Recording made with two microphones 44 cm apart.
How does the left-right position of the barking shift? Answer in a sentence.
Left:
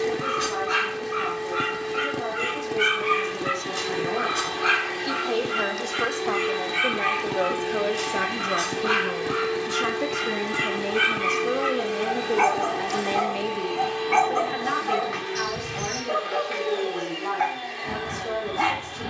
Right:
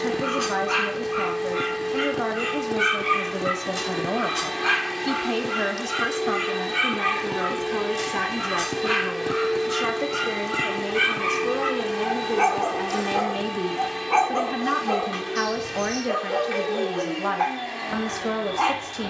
You can hear the barking move from left to right and back again.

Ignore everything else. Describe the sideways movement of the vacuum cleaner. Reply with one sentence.
You can hear the vacuum cleaner move from right to left and back again.